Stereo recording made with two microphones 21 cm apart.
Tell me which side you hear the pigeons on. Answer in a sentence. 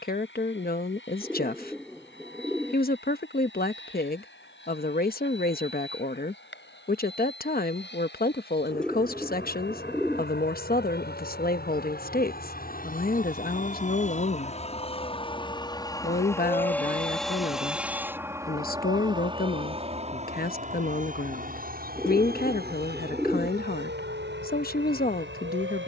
In this clip you hear the pigeons in the centre.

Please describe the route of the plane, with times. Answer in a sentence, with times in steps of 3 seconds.
In this clip you hear the plane on the left from 0 s, in the centre from 15 s and on the right from 18 s.